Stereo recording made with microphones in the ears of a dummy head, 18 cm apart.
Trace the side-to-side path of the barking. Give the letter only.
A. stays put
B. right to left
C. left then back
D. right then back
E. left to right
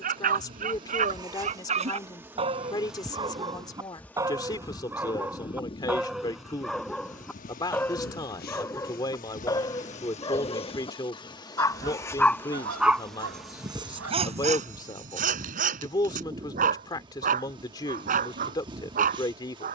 C.